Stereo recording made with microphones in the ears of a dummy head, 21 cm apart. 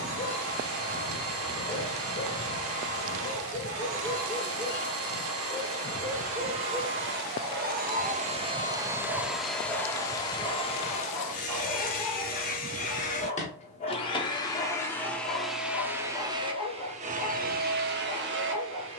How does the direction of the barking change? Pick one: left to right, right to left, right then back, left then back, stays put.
right then back.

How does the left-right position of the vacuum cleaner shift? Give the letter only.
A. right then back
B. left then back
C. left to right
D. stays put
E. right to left
B.